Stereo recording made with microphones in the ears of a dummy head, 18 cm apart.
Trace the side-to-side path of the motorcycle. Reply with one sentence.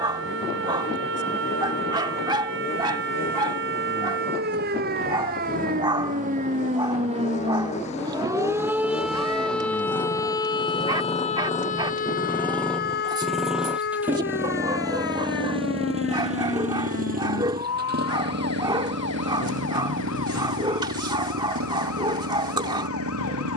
You can hear the motorcycle move from left to right.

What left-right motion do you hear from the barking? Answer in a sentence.
You can hear the barking stay in one place.